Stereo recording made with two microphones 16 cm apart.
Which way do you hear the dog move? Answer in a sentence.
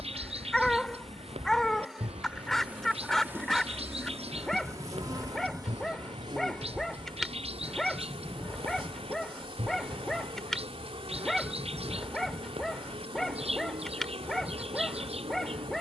In this clip you hear the dog stay put.